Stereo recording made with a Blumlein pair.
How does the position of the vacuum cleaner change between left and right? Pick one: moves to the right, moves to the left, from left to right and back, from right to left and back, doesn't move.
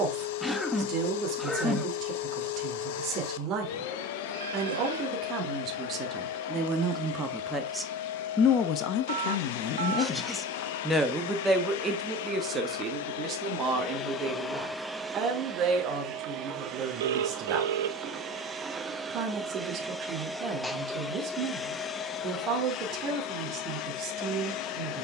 from left to right and back.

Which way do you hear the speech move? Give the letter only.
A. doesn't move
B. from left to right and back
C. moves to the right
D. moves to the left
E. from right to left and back
E.